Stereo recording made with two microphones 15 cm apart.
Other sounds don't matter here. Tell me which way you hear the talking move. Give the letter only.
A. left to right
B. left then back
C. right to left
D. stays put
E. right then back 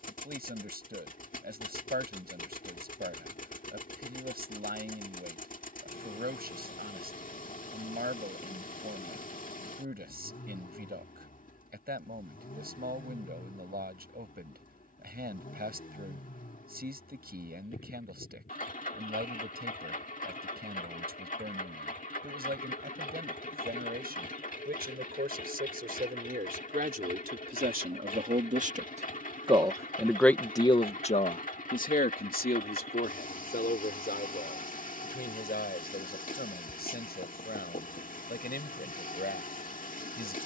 C.